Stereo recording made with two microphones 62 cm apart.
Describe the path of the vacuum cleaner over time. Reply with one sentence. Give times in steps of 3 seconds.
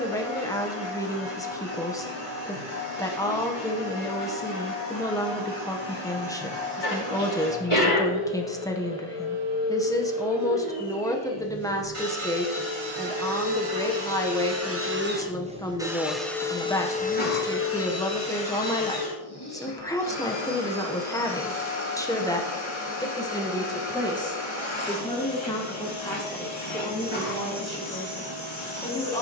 You can hear the vacuum cleaner on the right from 0 s, in the centre from 15 s and on the left from 18 s.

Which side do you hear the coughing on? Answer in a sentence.
In this clip you hear the coughing on the left.